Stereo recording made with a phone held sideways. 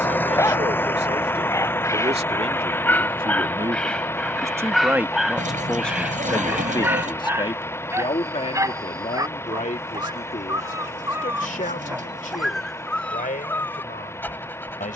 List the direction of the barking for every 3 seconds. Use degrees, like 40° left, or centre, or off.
20° left, centre, 20° right, 20° right, 10° left.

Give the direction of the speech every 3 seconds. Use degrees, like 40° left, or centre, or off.
50° right, 20° right, 40° left, 60° left, 80° left.